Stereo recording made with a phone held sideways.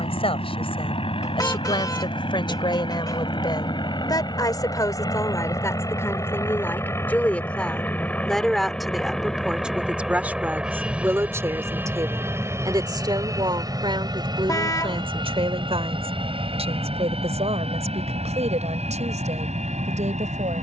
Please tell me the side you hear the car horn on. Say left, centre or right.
left.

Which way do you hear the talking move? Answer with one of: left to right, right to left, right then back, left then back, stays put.
left to right.